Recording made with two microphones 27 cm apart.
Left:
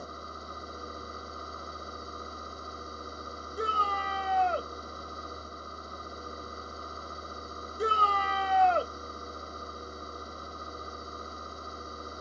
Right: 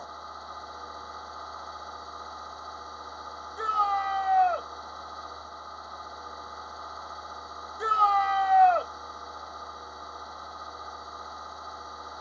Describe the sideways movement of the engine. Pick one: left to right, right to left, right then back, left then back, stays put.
stays put.